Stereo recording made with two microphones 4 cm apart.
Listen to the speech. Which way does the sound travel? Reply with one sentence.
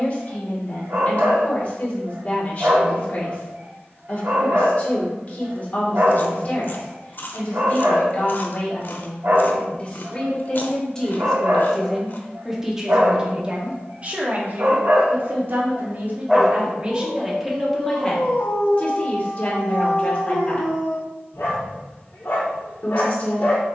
In this clip you hear the speech move from left to right and back again.